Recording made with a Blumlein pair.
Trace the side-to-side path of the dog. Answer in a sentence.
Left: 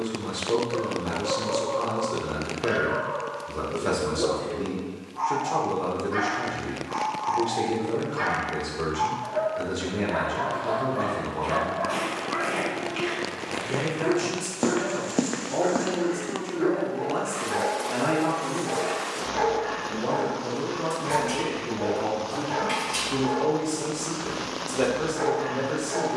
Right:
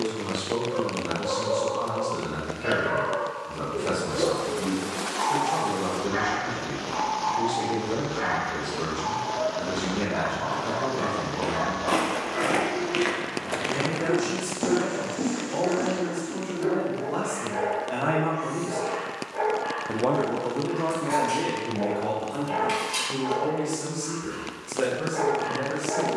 You can hear the dog go left and come back.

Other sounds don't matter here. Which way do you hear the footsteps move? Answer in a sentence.
In this clip you hear the footsteps go from the right side to the left.